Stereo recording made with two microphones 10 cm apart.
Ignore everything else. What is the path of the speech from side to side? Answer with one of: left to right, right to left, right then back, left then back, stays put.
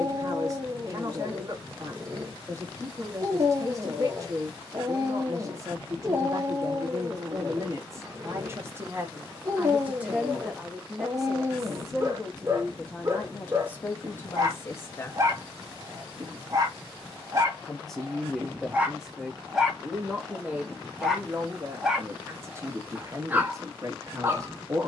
left then back.